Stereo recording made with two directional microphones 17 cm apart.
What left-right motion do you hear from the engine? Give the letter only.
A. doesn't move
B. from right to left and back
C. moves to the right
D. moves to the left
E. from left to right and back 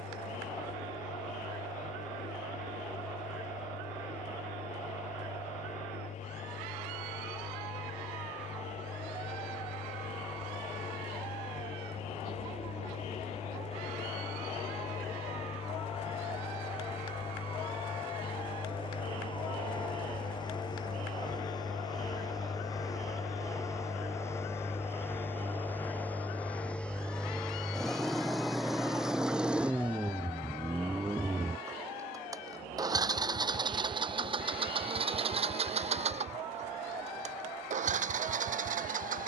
C.